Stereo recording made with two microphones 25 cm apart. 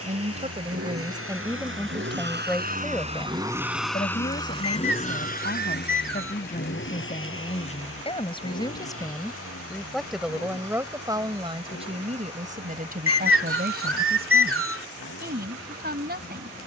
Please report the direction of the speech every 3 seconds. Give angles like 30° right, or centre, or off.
10° right, 30° left, 30° left, 10° right, 40° right, 40° right.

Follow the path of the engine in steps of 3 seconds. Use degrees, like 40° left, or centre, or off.
60° right, 10° left, 50° left, 70° left, 70° left, 70° left.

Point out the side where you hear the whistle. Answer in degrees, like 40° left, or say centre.
60° right.